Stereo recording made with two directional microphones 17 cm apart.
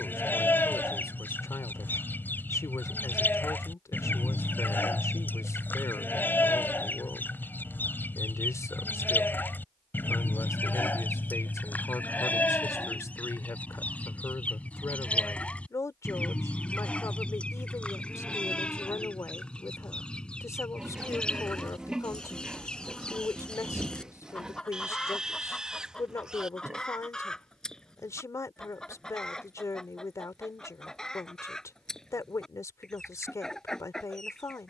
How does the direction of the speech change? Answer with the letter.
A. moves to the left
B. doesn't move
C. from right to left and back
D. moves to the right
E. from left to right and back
B.